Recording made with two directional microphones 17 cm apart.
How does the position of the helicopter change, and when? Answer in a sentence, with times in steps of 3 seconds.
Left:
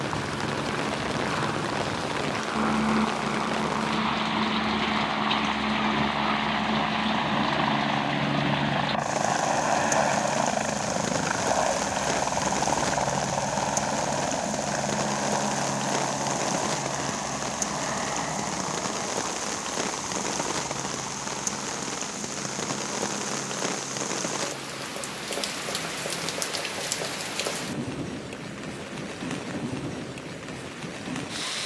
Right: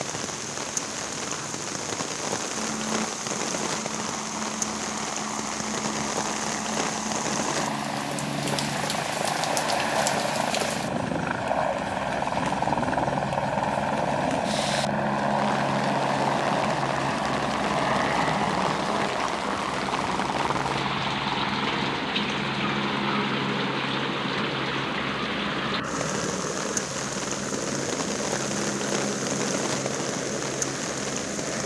In this clip you hear the helicopter on the left from 0 s, in the centre from 9 s and on the right from 15 s.